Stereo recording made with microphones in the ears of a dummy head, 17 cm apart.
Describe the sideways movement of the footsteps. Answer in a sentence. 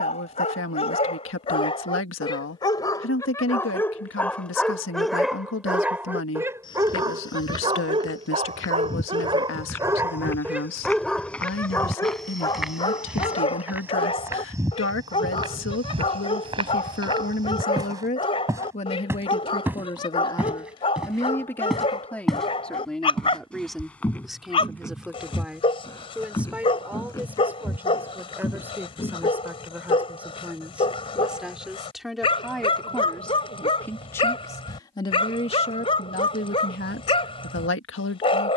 In this clip you hear the footsteps move from left to right and back again.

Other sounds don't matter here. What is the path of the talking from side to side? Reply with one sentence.
In this clip you hear the talking go right and come back.